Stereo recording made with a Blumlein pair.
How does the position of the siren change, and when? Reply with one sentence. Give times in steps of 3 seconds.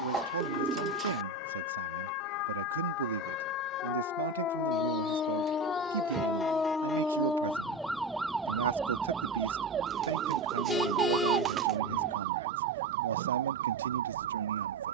In this clip you hear the siren on the left from 0 s, in the centre from 6 s and on the right from 9 s.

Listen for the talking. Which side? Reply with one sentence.
You can hear the talking on the right.